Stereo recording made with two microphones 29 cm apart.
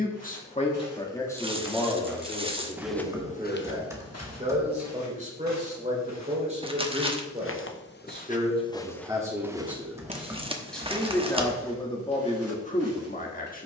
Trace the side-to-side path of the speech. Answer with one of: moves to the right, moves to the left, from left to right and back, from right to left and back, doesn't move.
from left to right and back.